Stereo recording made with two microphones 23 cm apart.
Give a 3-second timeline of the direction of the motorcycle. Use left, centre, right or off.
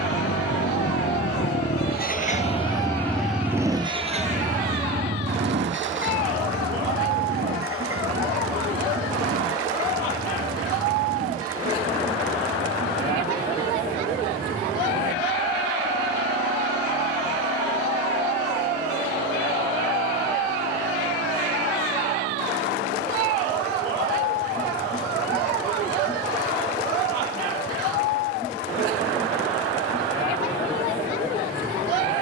left, right, right, right, right, right, right, right, right, right, off.